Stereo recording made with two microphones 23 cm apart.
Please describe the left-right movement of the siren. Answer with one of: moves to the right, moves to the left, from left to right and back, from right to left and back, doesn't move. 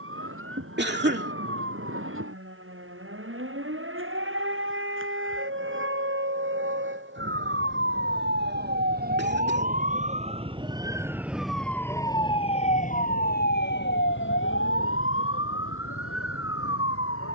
moves to the left.